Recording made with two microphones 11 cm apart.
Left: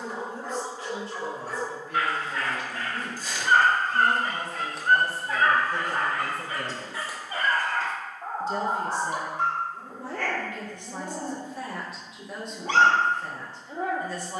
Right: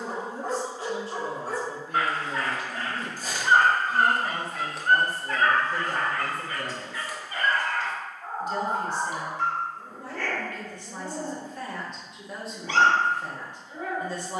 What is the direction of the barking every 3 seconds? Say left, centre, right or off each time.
right, centre, left, left, left.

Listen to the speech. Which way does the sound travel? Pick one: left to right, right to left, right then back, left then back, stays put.
left then back.